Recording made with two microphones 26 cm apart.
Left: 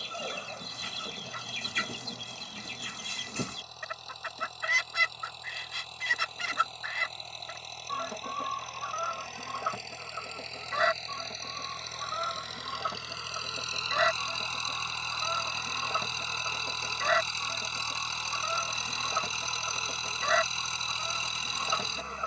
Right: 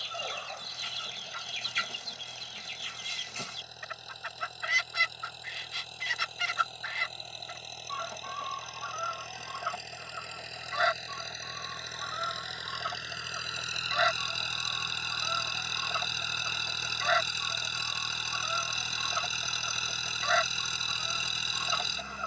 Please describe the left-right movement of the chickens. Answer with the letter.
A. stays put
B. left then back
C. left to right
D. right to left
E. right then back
A.